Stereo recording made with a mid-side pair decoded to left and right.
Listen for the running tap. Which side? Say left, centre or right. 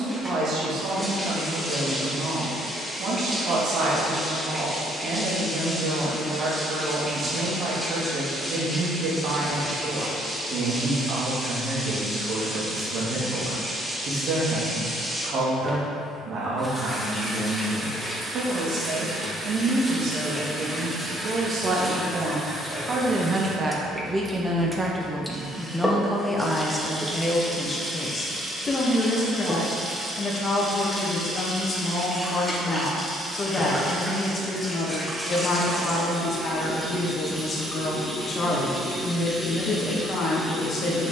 centre.